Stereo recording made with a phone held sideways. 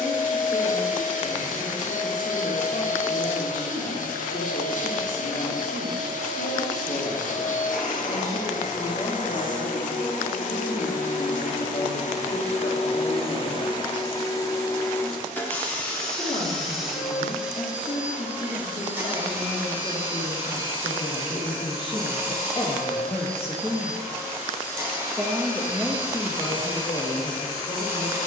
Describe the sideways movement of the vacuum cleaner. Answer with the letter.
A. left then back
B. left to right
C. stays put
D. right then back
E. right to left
B.